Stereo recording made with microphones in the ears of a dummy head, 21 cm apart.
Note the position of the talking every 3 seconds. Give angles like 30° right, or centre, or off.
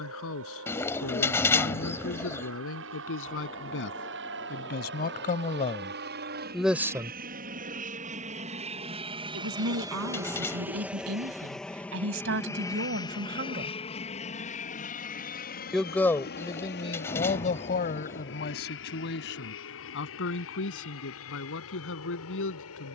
60° left, 40° left, 10° right, 70° right, 50° right, 20° left, 50° left, 60° left.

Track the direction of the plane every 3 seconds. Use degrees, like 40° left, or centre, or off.
70° right, 60° right, 40° right, 10° right, 20° left, 40° left, 50° left, 60° left.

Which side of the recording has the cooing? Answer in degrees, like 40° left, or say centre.
10° left.